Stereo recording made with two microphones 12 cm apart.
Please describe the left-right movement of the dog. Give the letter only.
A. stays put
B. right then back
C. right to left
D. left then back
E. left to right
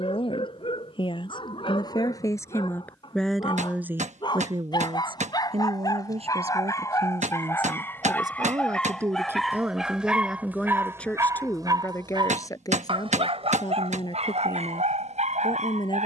E.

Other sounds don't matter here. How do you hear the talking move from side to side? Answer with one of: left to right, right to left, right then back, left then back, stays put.
right then back.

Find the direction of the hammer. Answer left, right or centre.
right.